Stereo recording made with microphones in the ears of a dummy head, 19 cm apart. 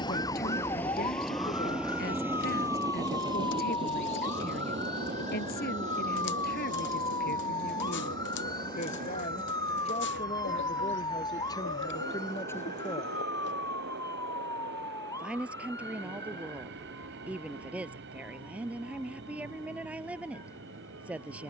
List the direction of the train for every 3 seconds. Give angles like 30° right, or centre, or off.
centre, 30° right, 40° right, 50° right, 50° right, 50° right, 50° right.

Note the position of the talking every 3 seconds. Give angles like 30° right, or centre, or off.
50° left, 50° left, 40° left, 20° left, 10° left, 10° right, 10° right.